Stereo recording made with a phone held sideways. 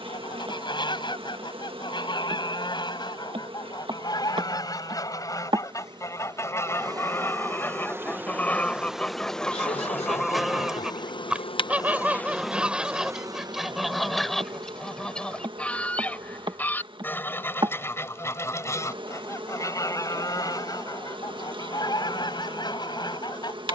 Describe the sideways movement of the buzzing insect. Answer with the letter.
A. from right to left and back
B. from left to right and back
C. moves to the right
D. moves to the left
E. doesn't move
A.